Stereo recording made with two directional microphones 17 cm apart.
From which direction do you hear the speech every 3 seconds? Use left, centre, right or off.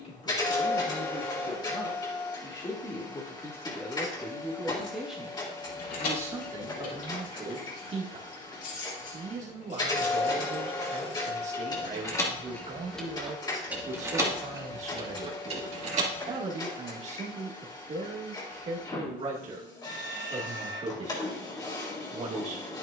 left, centre, right, right, right, right, right, right.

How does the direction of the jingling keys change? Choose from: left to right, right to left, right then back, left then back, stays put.
left to right.